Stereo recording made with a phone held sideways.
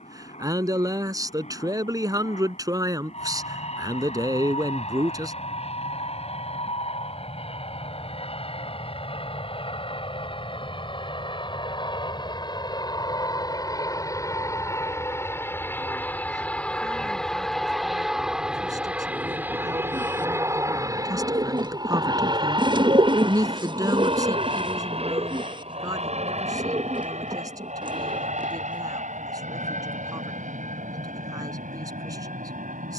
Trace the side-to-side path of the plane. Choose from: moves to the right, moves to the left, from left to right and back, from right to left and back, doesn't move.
moves to the right.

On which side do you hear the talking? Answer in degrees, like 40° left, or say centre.
30° right.